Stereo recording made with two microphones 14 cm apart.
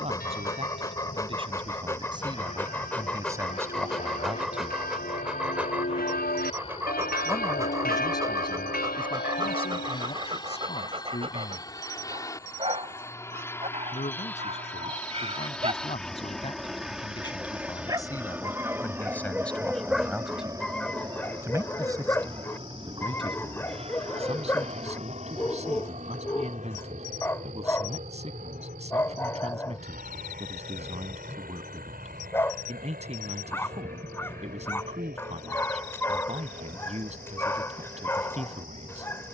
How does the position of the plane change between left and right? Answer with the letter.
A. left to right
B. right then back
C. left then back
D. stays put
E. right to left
A.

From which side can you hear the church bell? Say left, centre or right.
left.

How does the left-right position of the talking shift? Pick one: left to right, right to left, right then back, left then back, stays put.
left then back.